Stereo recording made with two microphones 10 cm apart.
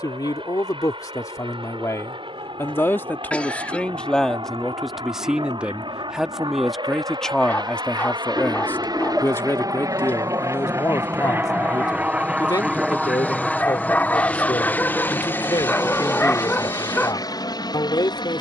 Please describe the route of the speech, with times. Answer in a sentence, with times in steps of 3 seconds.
In this clip you hear the speech on the left from 0 s, in the centre from 3 s and on the left from 9 s.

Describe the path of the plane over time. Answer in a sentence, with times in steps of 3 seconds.
In this clip you hear the plane on the right from 0 s, in the centre from 12 s and on the left from 15 s.